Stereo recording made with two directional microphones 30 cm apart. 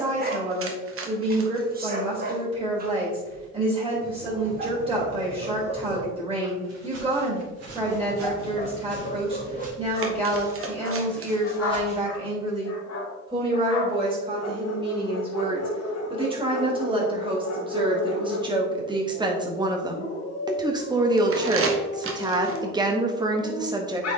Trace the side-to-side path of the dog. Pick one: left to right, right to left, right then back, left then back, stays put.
right to left.